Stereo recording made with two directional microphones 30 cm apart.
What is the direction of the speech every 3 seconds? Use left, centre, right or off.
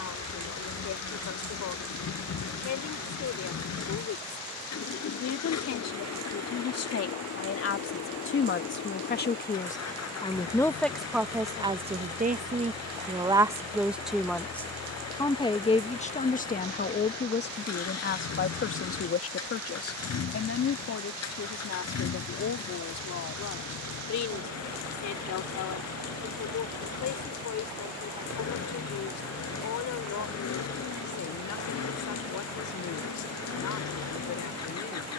left, left, left, centre, centre, left, left, left, left, left, left, left.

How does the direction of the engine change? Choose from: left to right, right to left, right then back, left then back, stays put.
stays put.